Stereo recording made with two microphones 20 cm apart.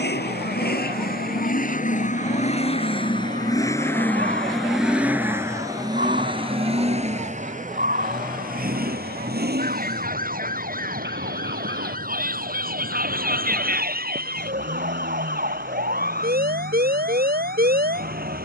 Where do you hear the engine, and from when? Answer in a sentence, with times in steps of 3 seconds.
In this clip you hear the engine on the left from 0 s, in the centre from 3 s and on the right from 6 s.